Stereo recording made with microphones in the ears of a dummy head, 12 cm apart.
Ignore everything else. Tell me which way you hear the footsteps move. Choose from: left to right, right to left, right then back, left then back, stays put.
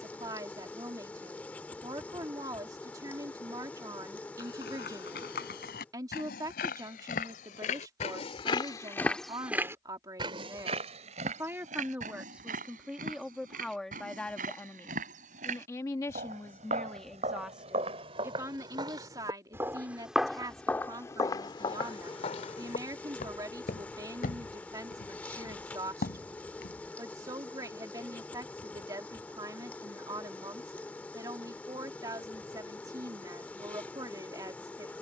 right then back.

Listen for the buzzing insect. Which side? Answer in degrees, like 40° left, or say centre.
10° left.